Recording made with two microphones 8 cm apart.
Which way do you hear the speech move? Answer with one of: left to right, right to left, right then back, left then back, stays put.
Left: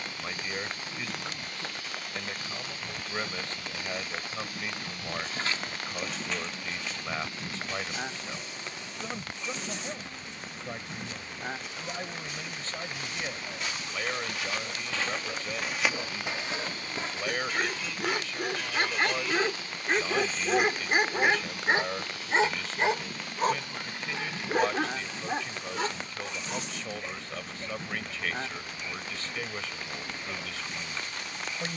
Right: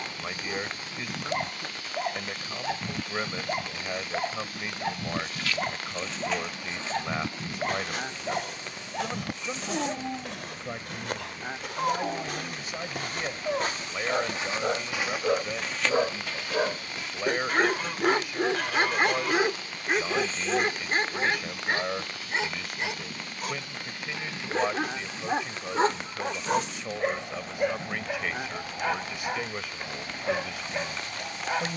stays put.